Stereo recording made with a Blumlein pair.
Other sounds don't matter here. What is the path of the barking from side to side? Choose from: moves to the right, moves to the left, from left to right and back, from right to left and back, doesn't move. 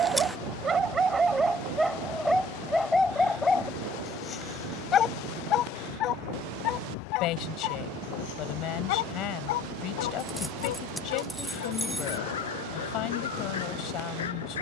moves to the left.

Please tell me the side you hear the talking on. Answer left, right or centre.
left.